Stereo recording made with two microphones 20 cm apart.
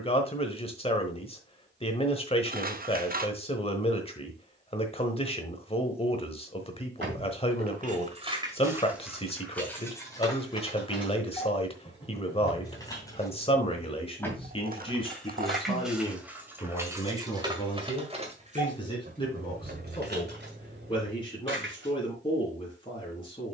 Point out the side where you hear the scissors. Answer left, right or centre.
right.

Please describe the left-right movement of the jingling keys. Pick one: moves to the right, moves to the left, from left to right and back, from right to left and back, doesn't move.
from right to left and back.